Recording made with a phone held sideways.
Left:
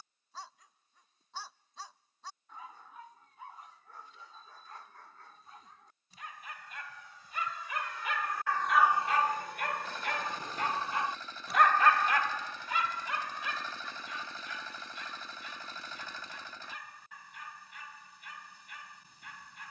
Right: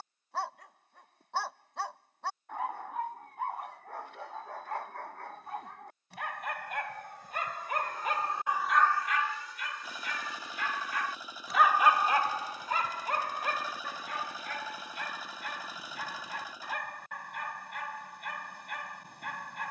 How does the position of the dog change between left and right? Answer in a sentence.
In this clip you hear the dog go left and come back.